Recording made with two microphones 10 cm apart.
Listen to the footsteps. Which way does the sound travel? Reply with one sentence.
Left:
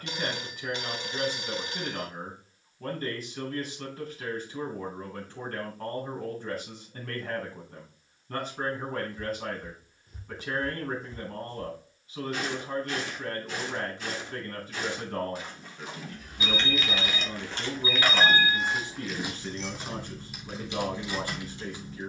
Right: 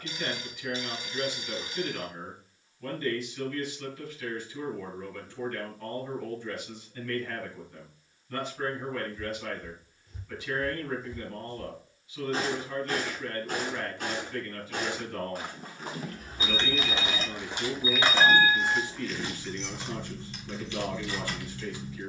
In this clip you hear the footsteps move from left to right and back again.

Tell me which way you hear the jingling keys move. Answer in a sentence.
You can hear the jingling keys go from the right side to the left.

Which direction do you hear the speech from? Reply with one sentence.
You can hear the speech on the left.